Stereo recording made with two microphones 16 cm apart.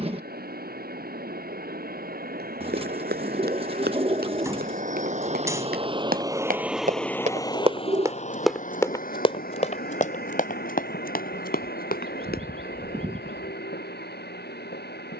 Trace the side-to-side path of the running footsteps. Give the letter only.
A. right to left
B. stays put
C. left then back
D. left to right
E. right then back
A.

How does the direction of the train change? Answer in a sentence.
You can hear the train move to the left.